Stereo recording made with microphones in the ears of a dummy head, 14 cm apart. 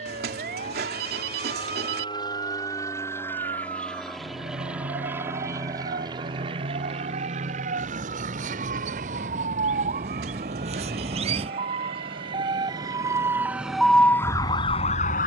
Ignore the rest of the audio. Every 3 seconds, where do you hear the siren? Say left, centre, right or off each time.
right, right, right, right, centre.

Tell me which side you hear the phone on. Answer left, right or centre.
right.